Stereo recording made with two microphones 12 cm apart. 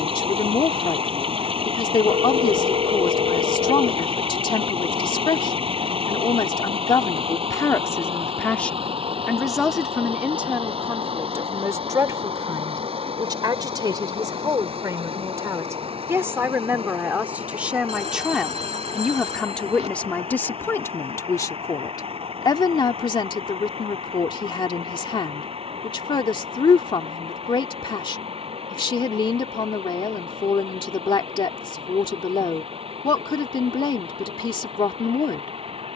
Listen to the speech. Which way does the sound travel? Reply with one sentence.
In this clip you hear the speech go right and come back.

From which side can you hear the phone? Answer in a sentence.
In this clip you hear the phone on the right.